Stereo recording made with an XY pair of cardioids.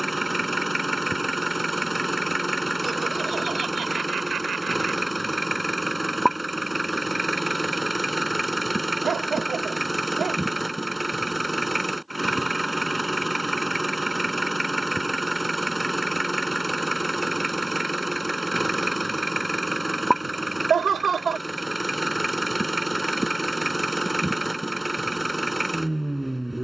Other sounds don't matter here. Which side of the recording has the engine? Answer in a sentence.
In this clip you hear the engine in the centre.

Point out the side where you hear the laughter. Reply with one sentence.
You can hear the laughter on the right.